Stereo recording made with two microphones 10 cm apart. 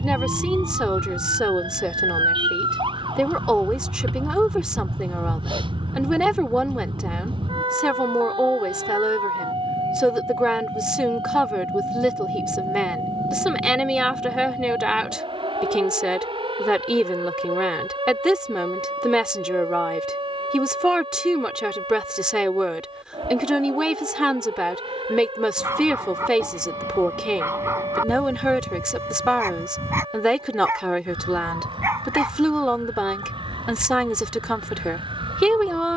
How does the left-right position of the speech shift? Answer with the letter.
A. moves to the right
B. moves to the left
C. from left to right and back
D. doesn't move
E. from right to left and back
D.